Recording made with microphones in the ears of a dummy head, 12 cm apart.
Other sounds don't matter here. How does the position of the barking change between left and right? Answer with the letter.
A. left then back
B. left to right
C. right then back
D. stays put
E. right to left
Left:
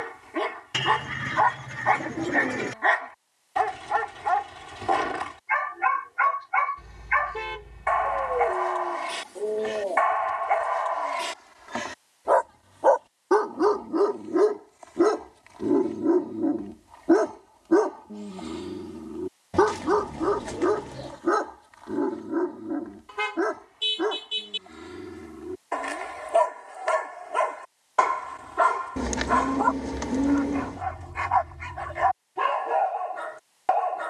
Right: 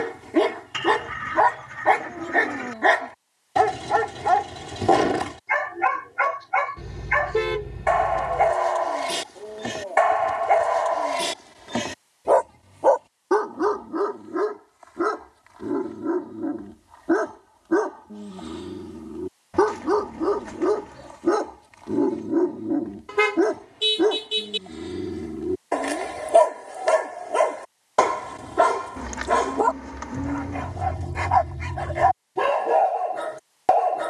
A.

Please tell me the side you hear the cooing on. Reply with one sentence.
In this clip you hear the cooing on the left.